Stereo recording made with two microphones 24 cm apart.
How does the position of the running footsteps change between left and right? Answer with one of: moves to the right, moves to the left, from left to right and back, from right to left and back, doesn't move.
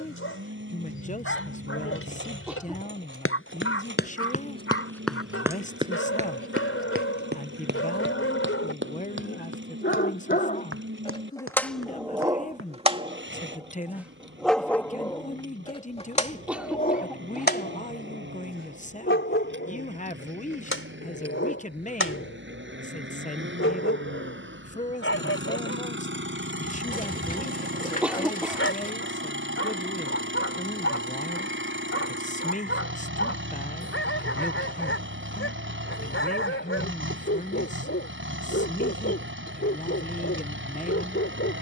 moves to the right.